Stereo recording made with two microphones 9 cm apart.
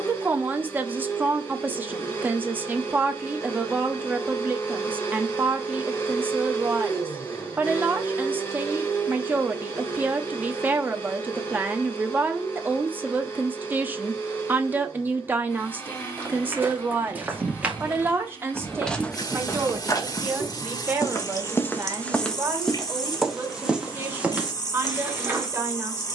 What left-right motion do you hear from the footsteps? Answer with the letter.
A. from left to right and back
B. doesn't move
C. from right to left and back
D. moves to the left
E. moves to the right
C.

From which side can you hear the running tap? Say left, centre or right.
left.